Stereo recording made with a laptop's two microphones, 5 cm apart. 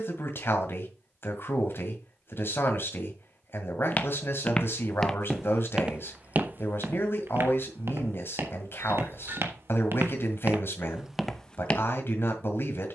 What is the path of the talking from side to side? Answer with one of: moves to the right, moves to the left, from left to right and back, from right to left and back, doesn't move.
doesn't move.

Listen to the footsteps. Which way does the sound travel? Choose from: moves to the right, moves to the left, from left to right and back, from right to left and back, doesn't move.
from left to right and back.